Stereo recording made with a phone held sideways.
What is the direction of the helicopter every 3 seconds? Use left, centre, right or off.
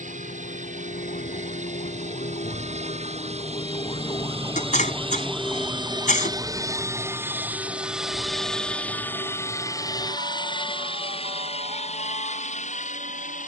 right, right, centre, left, left.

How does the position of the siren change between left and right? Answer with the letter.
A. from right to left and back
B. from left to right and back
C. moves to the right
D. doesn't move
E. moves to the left
C.